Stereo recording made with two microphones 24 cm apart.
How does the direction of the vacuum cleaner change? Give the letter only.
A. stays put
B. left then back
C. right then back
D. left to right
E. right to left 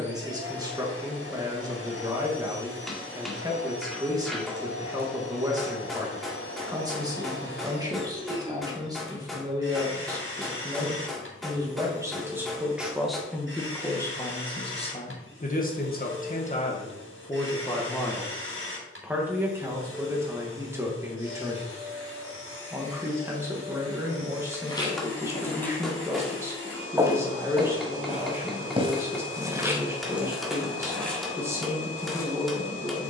A.